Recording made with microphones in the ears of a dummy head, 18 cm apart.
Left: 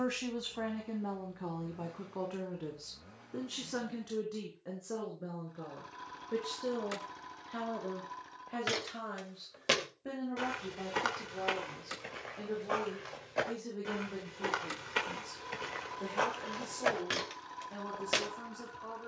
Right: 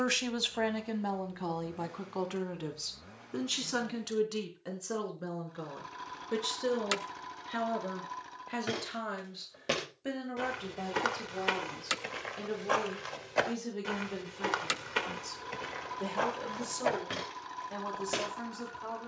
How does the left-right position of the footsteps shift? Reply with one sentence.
In this clip you hear the footsteps go right and come back.